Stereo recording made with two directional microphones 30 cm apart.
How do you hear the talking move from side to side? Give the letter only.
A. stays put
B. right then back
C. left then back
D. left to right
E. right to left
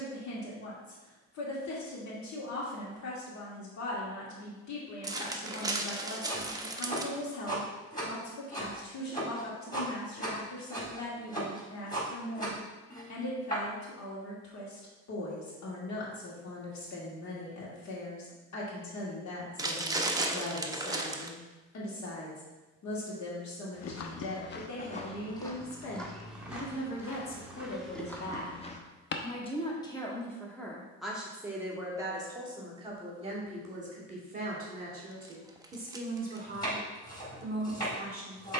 D.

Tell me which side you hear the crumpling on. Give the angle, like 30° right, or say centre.
10° right.